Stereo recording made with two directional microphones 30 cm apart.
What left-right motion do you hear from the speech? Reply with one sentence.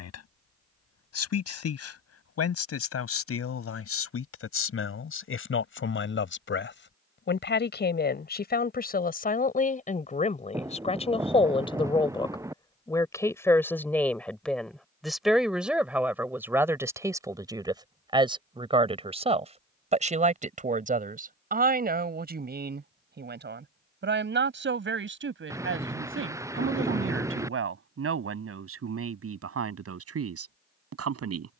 You can hear the speech travel towards the right.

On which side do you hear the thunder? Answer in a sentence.
In this clip you hear the thunder in the centre.